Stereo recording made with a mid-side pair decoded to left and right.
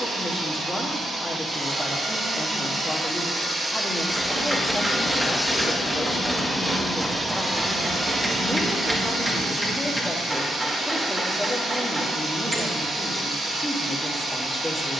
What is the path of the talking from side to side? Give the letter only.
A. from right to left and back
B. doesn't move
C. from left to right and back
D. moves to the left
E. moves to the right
B.